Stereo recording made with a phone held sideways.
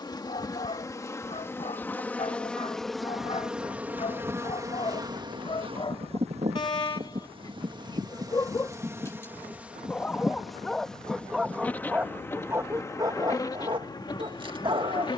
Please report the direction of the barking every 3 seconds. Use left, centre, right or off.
left, left, left, centre, right.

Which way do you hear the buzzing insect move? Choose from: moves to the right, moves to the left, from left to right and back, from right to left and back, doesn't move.
from left to right and back.